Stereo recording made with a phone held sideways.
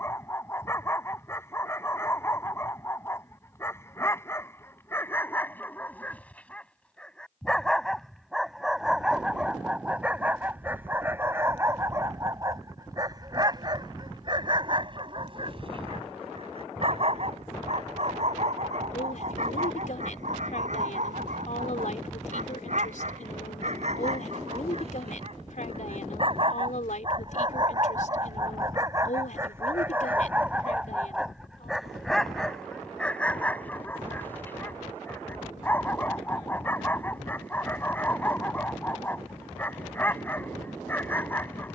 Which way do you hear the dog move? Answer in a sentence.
You can hear the dog move from left to right and back again.